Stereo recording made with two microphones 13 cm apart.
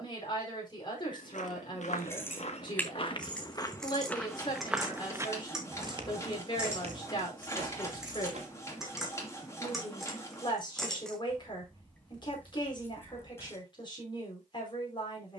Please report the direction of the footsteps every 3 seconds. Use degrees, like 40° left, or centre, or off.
60° left, 10° left, 50° right, off, off.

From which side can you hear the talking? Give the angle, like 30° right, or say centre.
40° left.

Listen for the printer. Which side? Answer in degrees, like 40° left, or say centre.
20° left.